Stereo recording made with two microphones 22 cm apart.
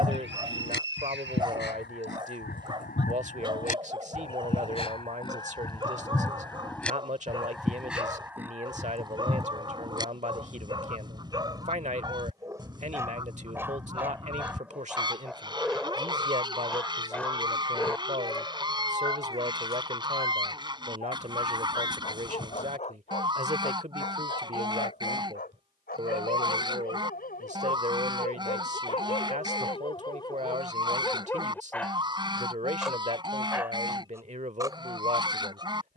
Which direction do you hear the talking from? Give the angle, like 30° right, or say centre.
40° right.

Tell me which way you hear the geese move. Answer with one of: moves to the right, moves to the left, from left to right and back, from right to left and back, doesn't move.
moves to the right.